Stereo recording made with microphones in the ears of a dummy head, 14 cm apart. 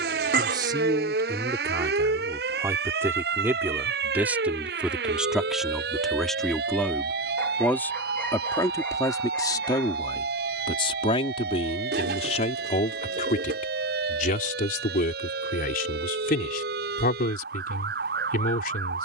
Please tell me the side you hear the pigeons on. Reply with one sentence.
You can hear the pigeons on the right.